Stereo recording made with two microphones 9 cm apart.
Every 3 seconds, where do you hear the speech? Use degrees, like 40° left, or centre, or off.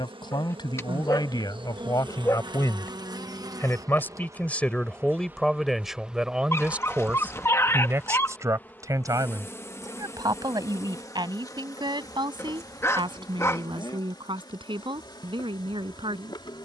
50° left, 10° left, 20° right, 50° right, 60° right, 60° right.